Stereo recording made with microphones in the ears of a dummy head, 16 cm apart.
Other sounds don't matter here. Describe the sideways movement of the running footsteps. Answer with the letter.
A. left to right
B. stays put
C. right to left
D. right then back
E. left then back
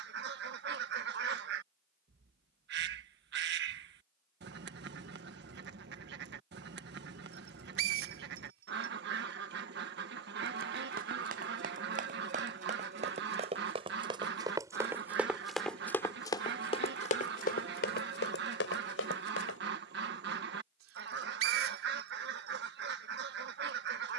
C.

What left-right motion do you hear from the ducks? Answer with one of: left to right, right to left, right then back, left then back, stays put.
stays put.